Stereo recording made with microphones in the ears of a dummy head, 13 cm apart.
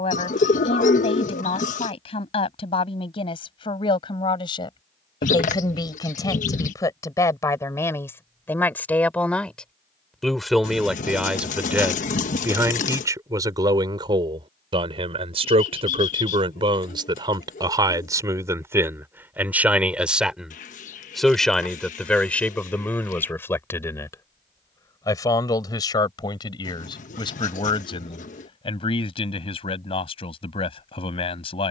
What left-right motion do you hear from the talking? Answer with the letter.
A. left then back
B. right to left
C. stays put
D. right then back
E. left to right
D.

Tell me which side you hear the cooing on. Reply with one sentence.
You can hear the cooing on the left.